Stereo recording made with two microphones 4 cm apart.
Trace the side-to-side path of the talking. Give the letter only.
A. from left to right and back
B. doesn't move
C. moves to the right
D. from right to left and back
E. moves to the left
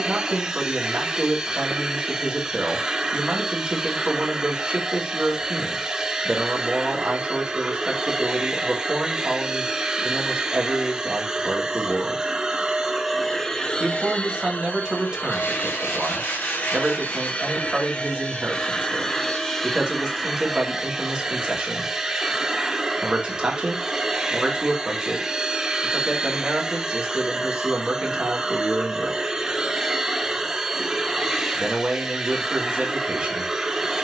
B.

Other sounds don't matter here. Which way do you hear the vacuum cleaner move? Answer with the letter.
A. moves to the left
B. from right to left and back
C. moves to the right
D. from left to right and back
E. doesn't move
B.